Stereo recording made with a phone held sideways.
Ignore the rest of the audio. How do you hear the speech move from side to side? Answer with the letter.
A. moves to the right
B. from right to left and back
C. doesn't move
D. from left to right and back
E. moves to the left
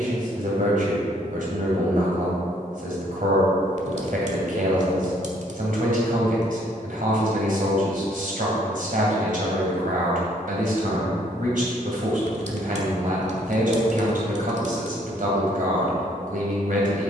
C.